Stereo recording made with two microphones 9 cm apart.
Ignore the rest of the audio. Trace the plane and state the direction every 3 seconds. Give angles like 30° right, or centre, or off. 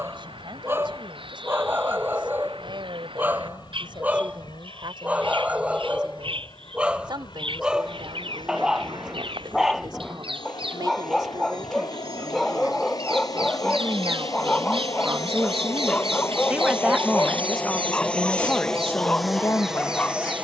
60° left, 60° left, 60° left, 50° left, 50° left, 30° left, centre.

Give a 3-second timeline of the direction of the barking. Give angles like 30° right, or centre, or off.
20° right, 20° right, 10° right, centre, 10° left, 10° left, 10° left.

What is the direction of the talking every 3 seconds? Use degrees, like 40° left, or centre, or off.
60° right, 60° right, 60° right, 50° right, 40° right, 10° right, 30° left.